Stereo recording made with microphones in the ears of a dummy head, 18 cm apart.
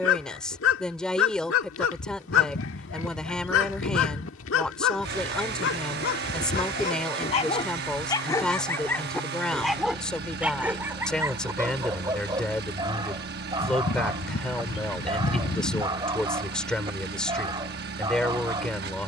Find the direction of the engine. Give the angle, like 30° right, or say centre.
50° right.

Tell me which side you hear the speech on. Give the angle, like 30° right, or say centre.
centre.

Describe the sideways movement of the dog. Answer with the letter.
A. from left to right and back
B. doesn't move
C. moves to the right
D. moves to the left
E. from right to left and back
C.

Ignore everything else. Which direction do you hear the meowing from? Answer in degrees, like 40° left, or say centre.
60° left.